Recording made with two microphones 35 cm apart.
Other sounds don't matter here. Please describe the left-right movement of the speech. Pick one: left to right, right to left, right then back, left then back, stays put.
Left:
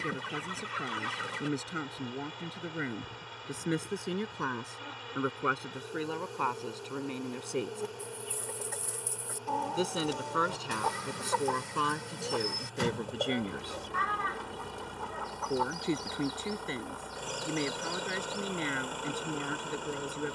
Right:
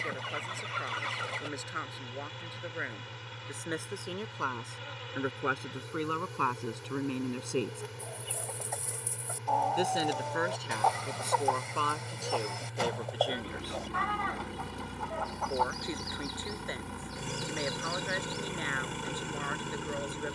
right then back.